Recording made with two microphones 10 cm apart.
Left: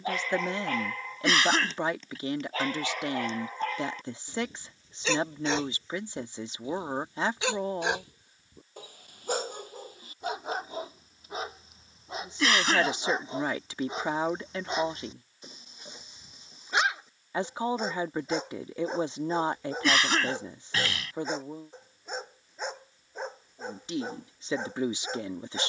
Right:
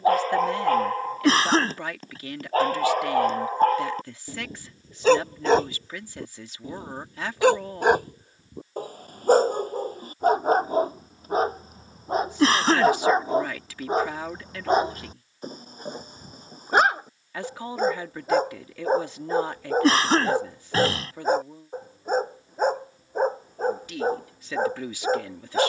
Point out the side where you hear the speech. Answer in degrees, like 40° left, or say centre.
20° left.